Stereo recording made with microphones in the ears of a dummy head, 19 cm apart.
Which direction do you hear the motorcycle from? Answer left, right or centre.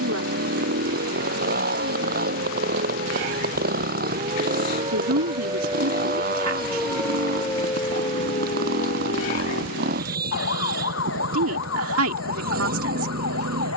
right.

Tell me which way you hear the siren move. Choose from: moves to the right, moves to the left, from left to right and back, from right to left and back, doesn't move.
moves to the left.